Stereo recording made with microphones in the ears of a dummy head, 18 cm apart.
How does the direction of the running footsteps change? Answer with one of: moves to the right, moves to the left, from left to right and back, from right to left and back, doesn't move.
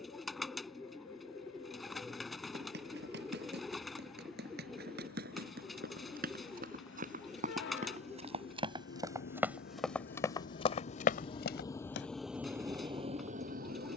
moves to the left.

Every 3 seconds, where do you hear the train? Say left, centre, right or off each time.
left, left, left, left, right.